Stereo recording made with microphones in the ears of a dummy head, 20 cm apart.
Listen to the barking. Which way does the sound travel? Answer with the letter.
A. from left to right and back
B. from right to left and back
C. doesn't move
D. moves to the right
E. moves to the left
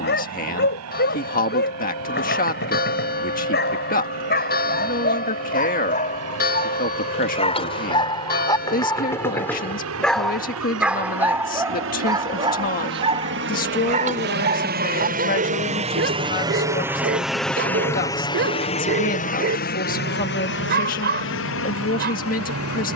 D.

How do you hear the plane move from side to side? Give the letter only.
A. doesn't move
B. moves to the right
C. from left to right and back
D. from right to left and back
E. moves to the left
E.